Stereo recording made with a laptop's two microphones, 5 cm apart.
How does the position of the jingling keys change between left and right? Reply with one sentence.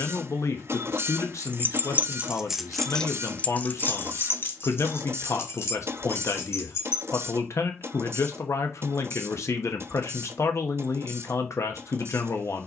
In this clip you hear the jingling keys move to the left.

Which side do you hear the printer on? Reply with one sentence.
You can hear the printer on the right.